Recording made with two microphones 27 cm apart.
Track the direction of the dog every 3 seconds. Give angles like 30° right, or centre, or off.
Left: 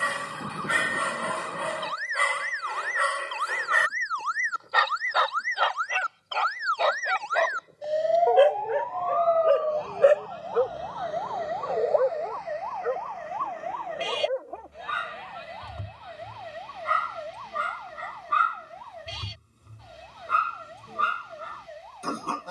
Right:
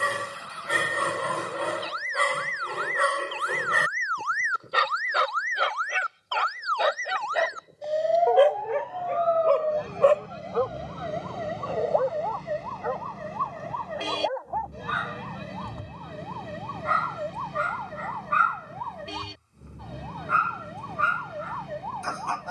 50° right, 40° right, 10° right, 20° left, 30° left, 30° left, 40° left, 40° left.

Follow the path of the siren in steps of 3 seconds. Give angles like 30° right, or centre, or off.
60° left, 40° left, 10° left, 20° right, 40° right, 50° right, 60° right, 60° right.